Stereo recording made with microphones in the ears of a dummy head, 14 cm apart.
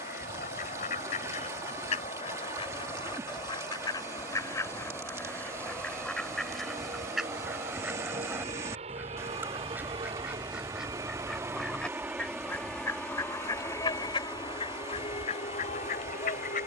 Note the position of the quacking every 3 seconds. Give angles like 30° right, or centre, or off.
50° left, 20° left, centre, 10° right, 30° left, 50° left.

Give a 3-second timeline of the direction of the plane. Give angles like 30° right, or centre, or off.
70° right, 70° right, 50° right, 30° right, 10° left, 40° left.